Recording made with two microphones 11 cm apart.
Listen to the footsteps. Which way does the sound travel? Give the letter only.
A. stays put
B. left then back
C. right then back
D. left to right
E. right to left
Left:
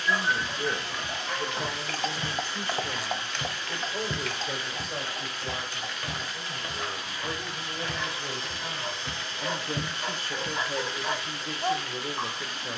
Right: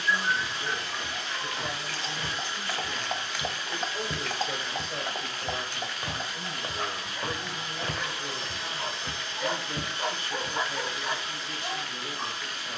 C.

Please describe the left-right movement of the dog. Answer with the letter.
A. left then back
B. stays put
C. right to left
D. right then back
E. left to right
D.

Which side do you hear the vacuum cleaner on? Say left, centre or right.
centre.